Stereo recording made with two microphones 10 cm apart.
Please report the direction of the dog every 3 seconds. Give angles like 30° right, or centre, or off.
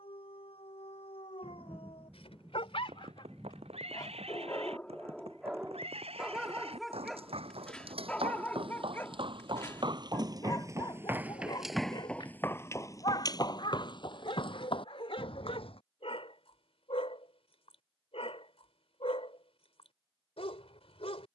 70° left, 20° left, 10° left, 40° left, 60° left, 70° left, 70° left.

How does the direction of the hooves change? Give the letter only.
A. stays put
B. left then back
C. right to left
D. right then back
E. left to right
C.